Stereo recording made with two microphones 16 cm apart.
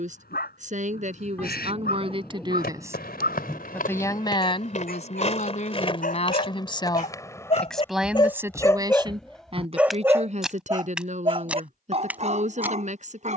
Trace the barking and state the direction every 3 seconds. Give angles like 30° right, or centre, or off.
80° left, 70° left, 40° left, 20° right, 50° right.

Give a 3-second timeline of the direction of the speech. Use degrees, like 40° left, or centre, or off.
40° right, 40° left, 10° left, 40° right, 50° right.